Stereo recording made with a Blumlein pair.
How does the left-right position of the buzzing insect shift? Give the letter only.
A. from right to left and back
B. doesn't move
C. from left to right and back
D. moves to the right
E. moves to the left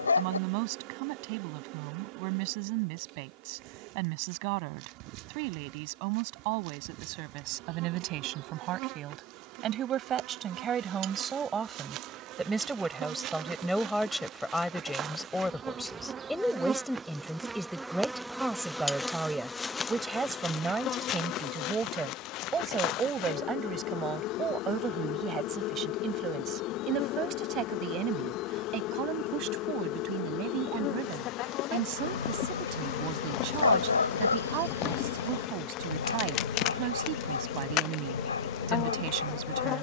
E.